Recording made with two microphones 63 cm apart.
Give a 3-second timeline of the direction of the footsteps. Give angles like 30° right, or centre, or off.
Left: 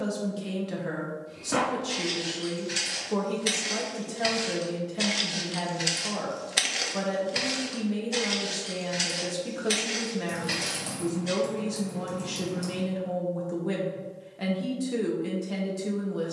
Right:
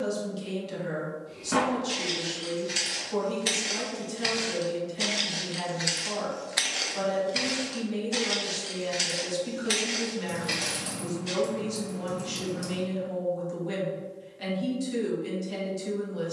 30° right, 10° left, 20° left, 30° right, off, off.